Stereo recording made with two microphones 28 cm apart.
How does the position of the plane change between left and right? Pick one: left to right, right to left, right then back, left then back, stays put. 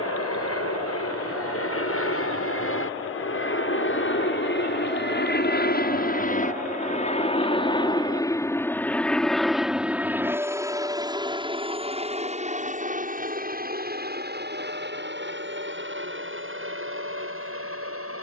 left to right.